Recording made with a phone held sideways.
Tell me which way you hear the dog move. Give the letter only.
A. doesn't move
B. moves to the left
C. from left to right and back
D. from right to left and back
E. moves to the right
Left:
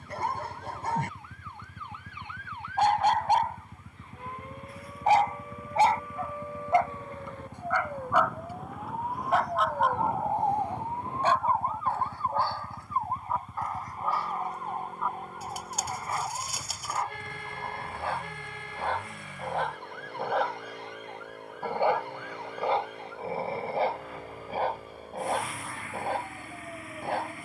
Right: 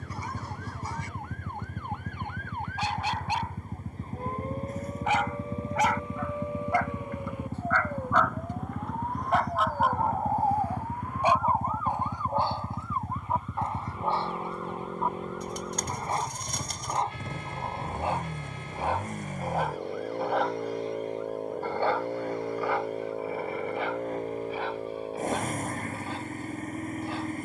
C.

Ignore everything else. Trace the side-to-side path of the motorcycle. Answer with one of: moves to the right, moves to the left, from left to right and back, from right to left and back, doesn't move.
doesn't move.